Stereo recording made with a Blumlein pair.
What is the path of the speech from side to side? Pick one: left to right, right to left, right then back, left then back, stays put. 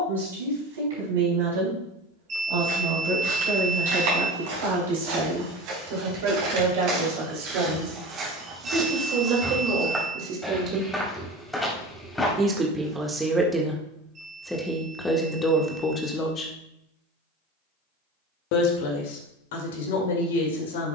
right to left.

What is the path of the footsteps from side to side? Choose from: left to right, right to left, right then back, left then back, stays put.
right to left.